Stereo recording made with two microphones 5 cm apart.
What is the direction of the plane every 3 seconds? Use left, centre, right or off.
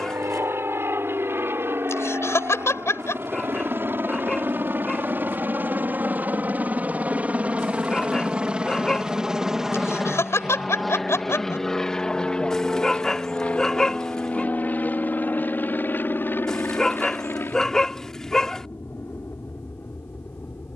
right, right, right, centre, left, left, left.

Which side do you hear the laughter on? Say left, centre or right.
left.